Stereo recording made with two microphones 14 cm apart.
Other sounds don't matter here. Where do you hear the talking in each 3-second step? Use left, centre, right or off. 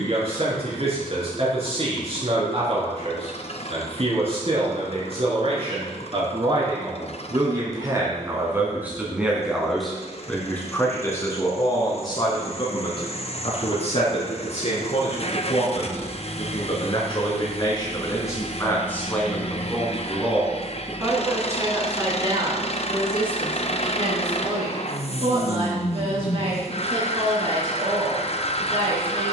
right, right, right, centre, left, left, centre, right, right, right.